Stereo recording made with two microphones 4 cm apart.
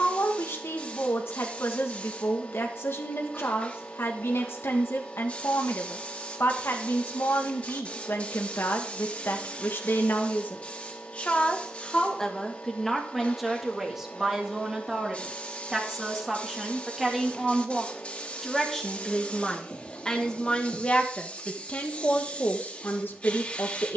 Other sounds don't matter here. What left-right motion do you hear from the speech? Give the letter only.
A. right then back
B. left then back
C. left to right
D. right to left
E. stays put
A.